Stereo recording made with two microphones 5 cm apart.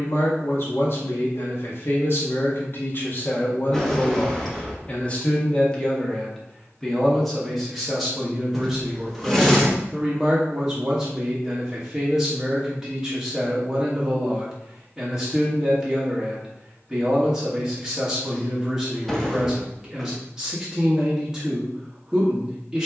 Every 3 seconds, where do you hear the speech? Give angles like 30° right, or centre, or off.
50° left, 30° left, centre, 10° right, 10° right, 10° right, 10° right, 10° right.